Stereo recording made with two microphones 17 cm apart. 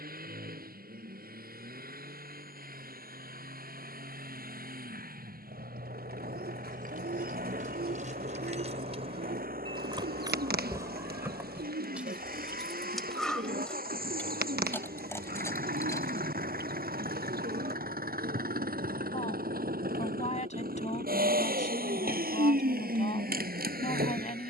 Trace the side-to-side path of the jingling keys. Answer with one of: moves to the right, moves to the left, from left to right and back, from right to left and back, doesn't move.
moves to the left.